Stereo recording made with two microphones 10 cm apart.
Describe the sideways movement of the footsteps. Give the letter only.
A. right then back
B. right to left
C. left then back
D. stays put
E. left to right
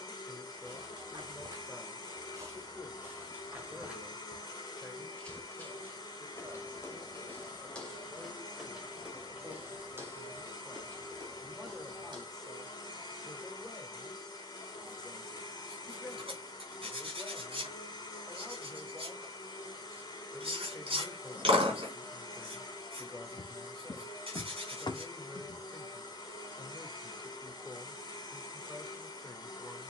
C.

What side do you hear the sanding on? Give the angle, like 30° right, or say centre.
60° right.